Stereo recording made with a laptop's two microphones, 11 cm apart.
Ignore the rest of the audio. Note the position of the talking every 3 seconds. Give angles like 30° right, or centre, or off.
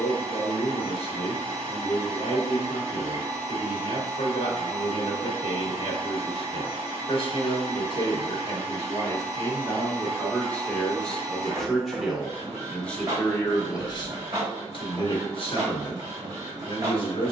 50° left, 50° left, 40° left, 10° left, 20° left, 50° left.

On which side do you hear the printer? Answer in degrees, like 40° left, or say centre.
40° right.